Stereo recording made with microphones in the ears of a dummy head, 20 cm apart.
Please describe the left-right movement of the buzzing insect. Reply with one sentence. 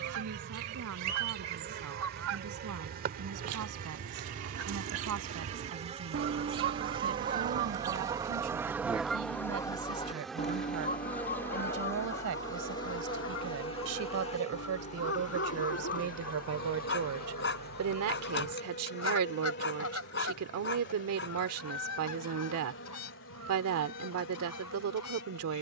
You can hear the buzzing insect move from right to left.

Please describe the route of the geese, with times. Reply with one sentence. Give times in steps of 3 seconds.
You can hear the geese on the right from 0 s and on the left from 9 s.